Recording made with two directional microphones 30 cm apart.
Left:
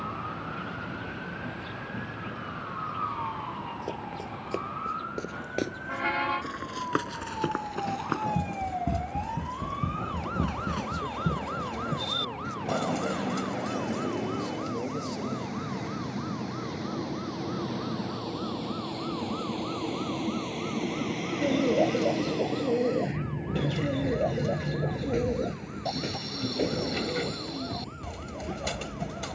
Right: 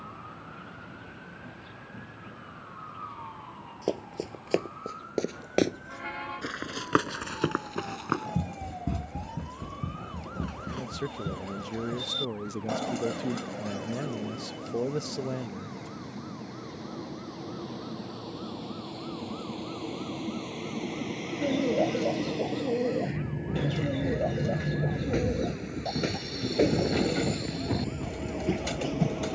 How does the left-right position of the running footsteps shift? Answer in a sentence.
In this clip you hear the running footsteps go from the right side to the left.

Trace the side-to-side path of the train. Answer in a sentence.
You can hear the train move to the right.